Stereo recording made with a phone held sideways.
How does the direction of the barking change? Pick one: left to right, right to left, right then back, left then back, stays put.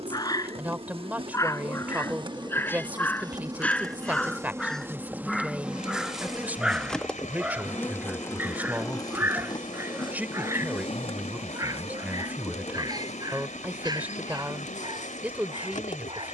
left to right.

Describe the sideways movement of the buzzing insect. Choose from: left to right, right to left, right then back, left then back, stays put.
right to left.